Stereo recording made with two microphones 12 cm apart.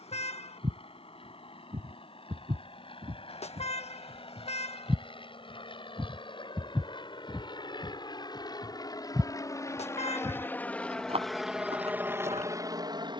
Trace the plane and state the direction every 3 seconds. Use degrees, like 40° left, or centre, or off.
60° left, 50° left, 40° left, 10° left, 30° right.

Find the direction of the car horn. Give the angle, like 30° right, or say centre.
60° left.